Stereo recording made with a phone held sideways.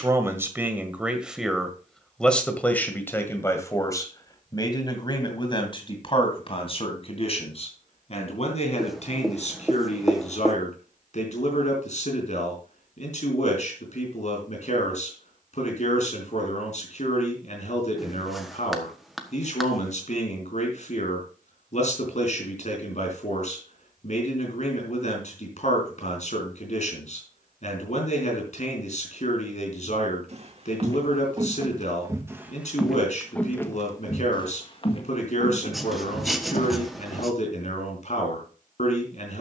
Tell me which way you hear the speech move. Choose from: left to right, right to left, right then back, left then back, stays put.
right to left.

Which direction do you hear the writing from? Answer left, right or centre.
centre.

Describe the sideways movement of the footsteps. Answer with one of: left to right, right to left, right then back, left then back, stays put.
right to left.